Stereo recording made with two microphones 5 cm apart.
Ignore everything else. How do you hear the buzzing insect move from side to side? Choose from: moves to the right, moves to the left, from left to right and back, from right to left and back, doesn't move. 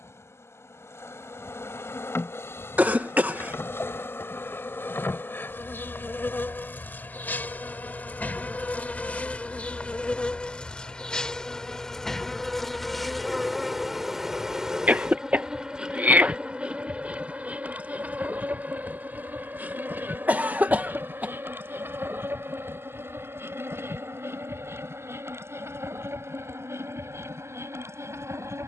moves to the right.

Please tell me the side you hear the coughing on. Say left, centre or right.
right.